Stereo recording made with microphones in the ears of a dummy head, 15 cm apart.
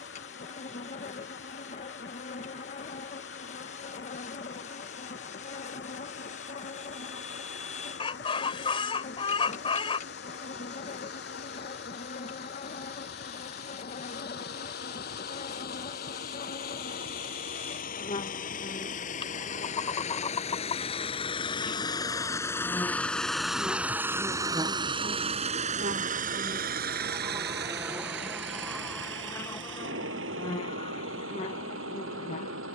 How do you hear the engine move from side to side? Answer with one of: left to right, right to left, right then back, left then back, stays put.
left to right.